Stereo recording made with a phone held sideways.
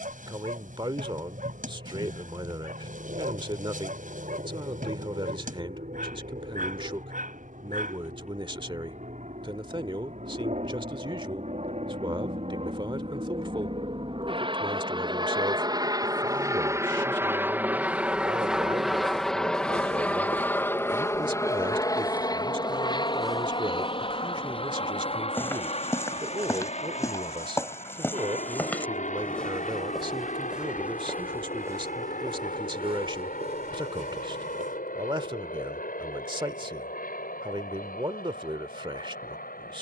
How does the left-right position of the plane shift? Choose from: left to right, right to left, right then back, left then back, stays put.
right to left.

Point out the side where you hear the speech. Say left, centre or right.
right.